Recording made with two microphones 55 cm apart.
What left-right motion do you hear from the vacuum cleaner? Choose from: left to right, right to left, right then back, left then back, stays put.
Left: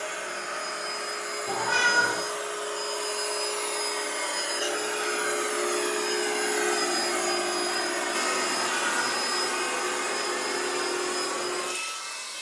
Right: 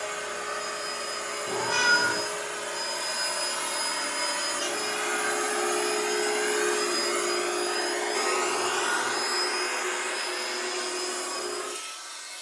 right to left.